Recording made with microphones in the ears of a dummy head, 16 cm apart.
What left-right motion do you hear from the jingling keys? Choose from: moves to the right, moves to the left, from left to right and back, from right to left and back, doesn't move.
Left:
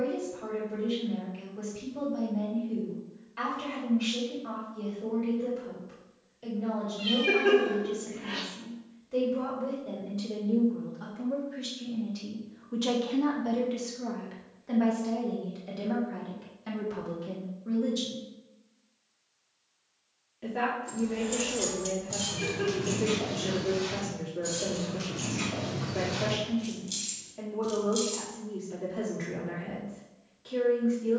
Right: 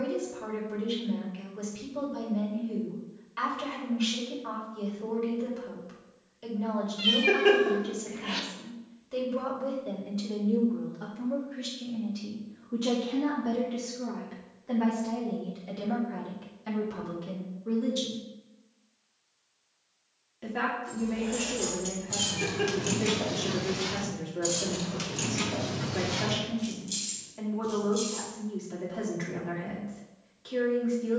from left to right and back.